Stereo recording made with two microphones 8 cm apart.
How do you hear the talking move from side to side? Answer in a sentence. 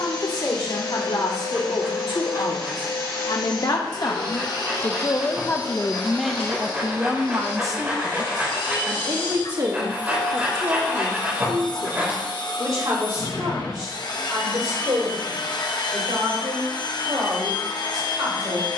You can hear the talking move from left to right.